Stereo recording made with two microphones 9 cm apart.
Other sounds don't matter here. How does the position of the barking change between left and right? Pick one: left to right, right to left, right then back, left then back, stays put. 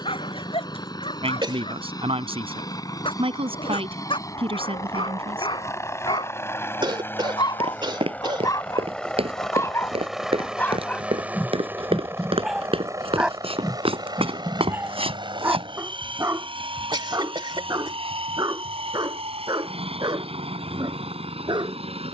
left to right.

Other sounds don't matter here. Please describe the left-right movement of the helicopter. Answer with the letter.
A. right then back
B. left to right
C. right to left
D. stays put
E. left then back
B.